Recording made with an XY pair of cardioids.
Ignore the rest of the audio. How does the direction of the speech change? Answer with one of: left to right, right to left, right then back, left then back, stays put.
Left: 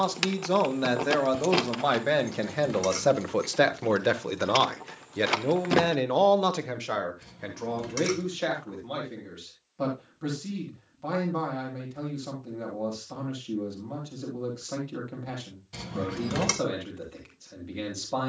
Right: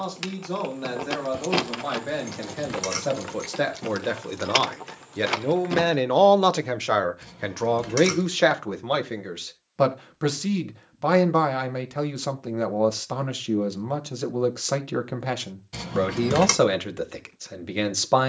left to right.